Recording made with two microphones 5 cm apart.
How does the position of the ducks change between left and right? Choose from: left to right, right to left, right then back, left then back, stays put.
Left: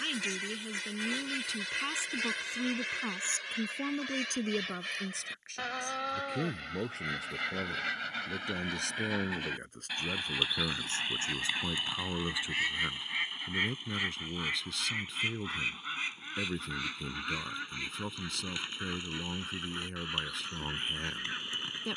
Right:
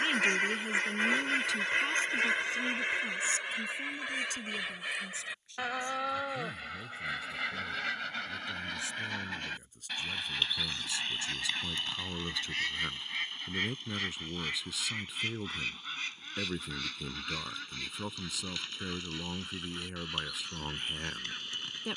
right to left.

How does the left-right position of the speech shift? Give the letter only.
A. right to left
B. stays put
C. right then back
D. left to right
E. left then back
E.